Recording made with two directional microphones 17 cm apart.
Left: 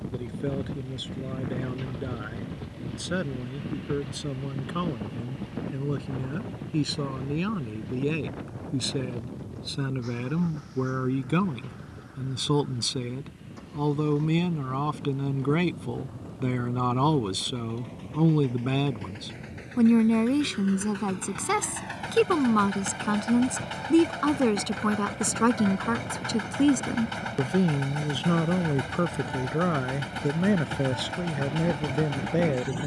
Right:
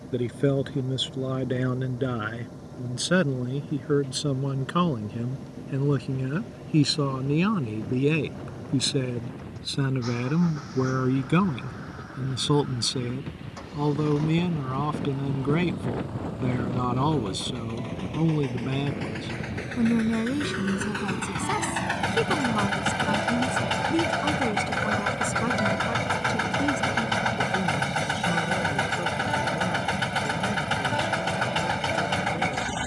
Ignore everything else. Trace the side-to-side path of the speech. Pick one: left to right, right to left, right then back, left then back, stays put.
right to left.